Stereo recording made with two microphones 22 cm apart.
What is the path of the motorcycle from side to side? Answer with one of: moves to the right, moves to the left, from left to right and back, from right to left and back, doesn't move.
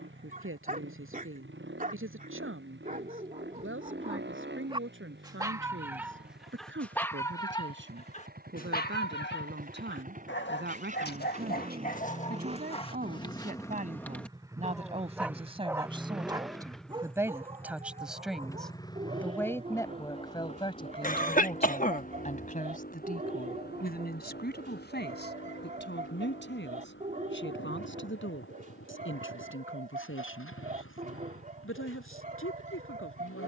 moves to the left.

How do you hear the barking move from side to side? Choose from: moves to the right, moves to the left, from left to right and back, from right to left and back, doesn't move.
from right to left and back.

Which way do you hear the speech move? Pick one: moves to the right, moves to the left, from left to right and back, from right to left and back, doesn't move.
moves to the left.